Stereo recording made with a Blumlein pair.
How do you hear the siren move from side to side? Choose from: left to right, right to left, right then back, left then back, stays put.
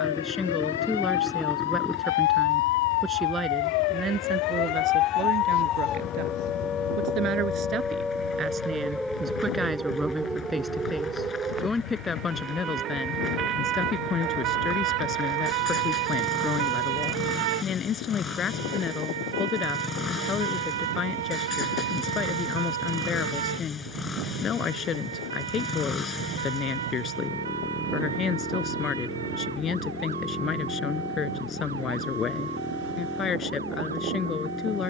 left to right.